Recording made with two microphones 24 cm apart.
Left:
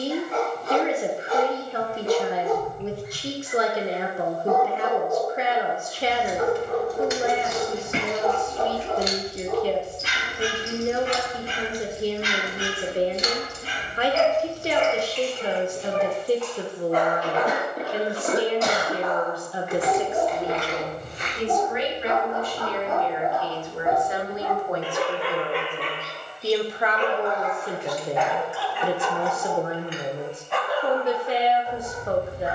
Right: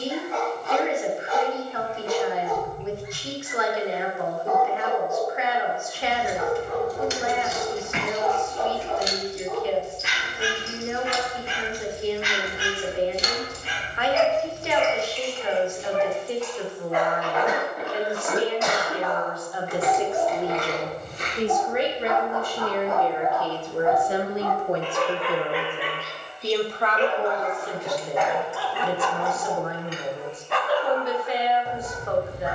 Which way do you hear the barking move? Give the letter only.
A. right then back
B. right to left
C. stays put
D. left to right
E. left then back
D.